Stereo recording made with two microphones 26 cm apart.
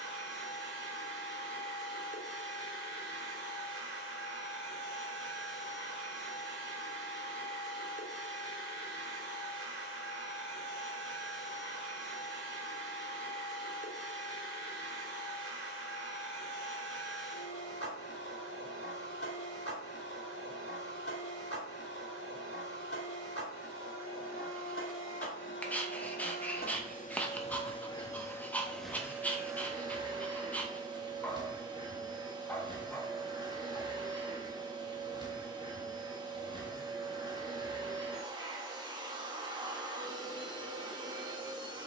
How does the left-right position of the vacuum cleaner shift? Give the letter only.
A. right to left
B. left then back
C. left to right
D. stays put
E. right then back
C.